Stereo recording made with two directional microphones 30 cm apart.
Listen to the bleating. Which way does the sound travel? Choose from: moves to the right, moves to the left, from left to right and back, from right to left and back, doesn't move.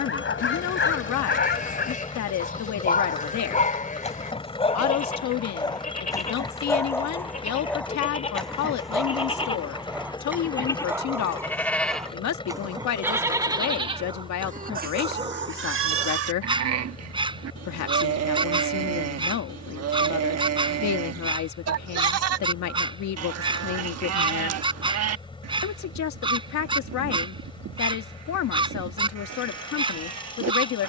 moves to the right.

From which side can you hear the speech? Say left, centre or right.
left.